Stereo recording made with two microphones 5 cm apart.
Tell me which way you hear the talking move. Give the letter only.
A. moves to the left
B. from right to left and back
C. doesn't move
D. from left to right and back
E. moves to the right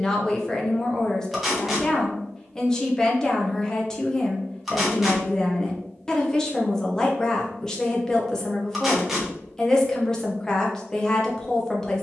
C.